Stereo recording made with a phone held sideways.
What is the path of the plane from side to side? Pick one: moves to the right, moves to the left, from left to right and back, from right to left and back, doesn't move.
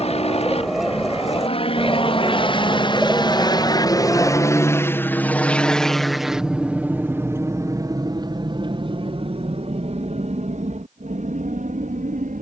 moves to the right.